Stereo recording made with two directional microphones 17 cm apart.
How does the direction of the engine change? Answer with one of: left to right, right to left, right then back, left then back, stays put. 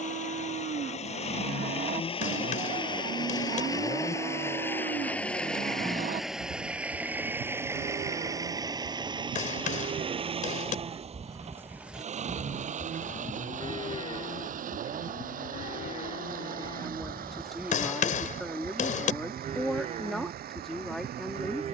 left to right.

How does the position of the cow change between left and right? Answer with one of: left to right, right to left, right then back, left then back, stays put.
left then back.